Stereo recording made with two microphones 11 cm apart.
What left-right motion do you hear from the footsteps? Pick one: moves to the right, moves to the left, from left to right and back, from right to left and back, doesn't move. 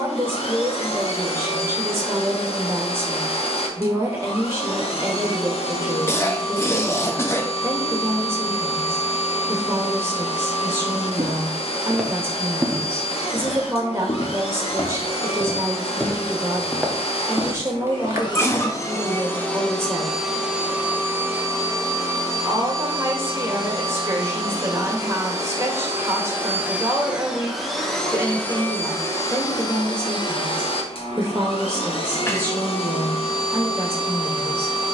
from right to left and back.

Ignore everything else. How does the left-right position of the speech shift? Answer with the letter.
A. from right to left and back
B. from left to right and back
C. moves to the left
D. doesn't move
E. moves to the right
D.